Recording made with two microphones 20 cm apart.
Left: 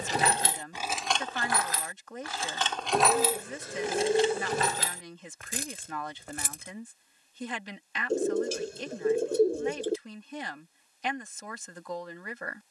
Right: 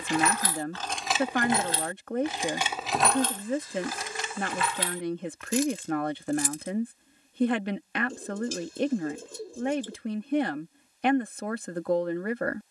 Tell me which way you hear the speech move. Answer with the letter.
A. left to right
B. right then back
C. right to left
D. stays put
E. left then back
D.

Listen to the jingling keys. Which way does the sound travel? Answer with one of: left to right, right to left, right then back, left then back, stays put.
right then back.